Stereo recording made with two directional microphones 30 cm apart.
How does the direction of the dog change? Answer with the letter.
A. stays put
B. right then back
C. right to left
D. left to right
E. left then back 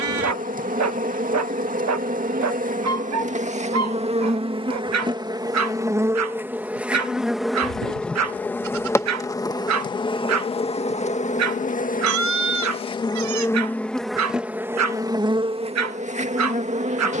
A.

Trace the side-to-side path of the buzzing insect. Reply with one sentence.
You can hear the buzzing insect go left and come back.